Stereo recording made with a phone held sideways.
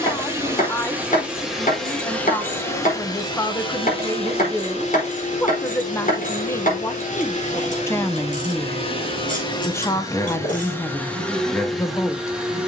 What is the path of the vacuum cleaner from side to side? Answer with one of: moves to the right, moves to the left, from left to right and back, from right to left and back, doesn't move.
from right to left and back.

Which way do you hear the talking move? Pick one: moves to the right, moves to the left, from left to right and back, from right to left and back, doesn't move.
doesn't move.